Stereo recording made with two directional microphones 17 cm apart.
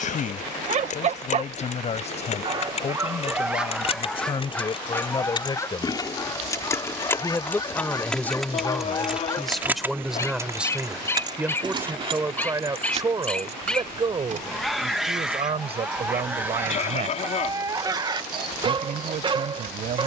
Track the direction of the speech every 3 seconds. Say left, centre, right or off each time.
left, left, centre, centre, right, right, right.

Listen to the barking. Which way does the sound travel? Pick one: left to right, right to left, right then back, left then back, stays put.
left then back.